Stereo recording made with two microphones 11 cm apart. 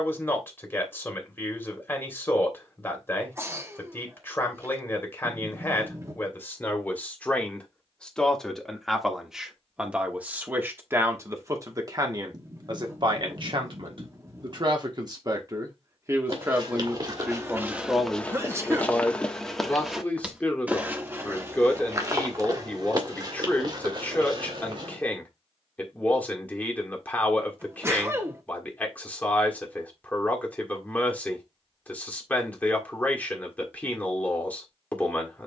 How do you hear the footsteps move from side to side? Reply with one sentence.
You can hear the footsteps move from right to left and back again.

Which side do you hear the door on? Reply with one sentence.
In this clip you hear the door on the right.